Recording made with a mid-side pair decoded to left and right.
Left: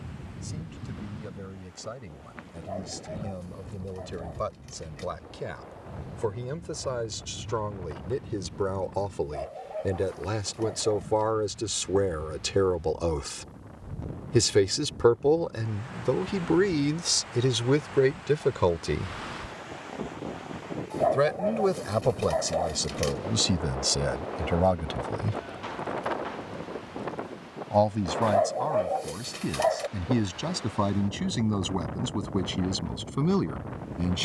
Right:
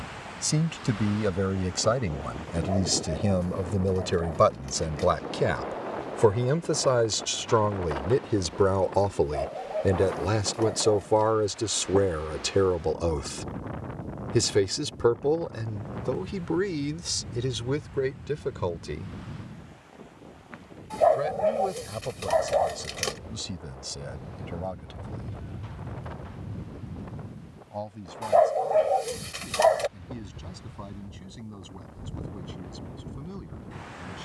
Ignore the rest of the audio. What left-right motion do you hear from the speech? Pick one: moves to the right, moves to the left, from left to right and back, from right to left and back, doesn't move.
moves to the left.